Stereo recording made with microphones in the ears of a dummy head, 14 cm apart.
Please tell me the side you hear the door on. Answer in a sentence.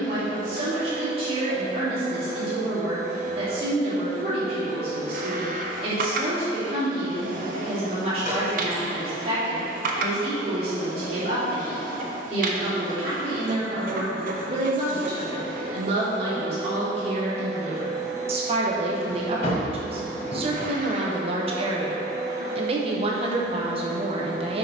You can hear the door on the left.